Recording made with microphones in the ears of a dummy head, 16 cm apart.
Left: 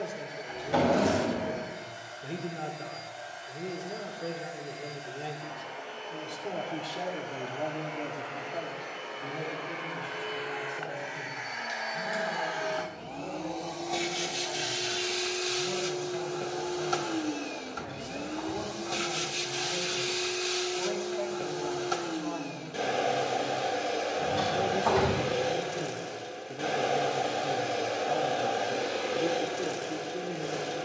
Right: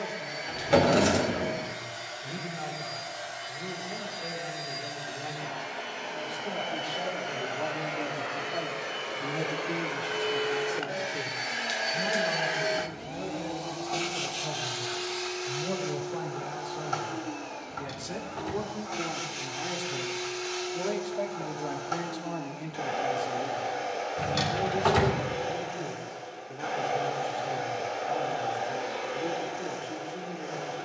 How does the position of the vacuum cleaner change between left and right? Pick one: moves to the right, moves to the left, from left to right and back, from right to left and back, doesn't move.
moves to the left.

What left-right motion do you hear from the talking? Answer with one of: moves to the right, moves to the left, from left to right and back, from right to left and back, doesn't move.
from left to right and back.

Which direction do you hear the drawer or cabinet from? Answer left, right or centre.
right.